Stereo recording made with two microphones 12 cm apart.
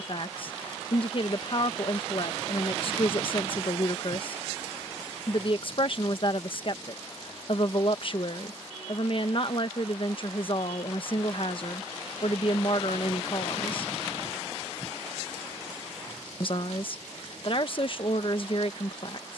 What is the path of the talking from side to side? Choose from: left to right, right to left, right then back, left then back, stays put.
stays put.